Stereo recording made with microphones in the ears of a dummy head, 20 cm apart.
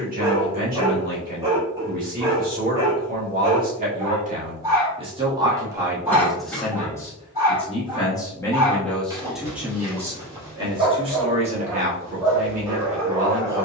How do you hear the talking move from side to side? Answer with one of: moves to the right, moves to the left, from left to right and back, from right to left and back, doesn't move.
from right to left and back.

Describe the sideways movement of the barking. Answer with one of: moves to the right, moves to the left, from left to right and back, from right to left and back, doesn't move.
doesn't move.